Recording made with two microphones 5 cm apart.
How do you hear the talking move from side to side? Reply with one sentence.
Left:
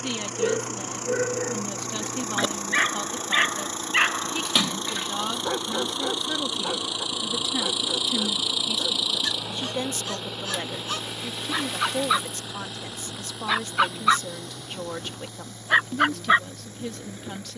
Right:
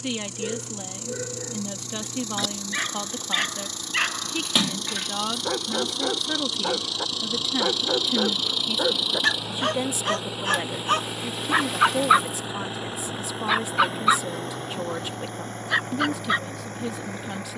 In this clip you hear the talking stay in one place.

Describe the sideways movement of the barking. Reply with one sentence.
In this clip you hear the barking go right and come back.